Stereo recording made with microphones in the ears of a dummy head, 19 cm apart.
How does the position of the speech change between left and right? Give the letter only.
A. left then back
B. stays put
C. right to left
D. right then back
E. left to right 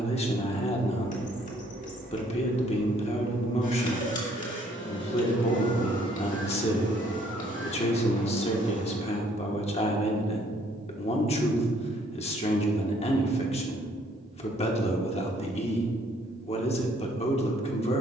B.